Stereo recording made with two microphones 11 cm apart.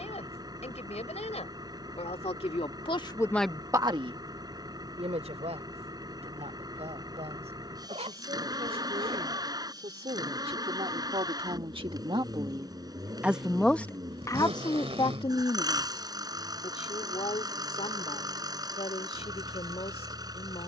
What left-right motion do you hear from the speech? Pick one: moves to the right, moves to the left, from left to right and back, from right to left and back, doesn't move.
from left to right and back.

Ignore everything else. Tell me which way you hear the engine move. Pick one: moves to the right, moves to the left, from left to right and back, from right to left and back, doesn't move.
doesn't move.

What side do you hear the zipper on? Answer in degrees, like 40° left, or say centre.
60° right.